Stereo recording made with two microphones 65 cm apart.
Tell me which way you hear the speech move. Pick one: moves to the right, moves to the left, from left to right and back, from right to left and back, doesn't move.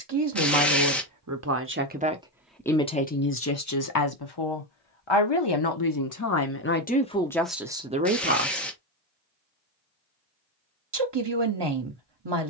from right to left and back.